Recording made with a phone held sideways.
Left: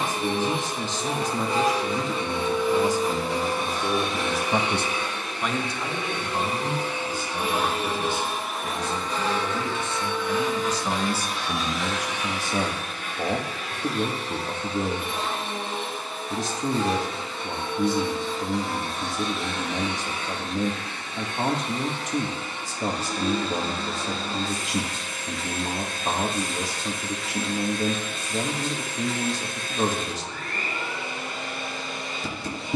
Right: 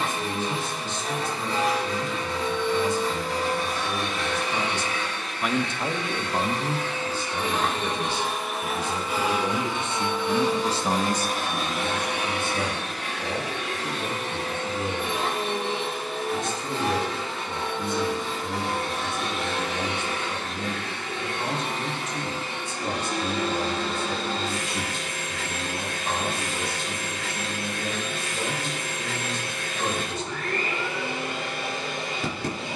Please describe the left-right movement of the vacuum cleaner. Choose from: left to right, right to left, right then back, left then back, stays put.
left to right.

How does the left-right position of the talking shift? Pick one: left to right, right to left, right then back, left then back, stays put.
right then back.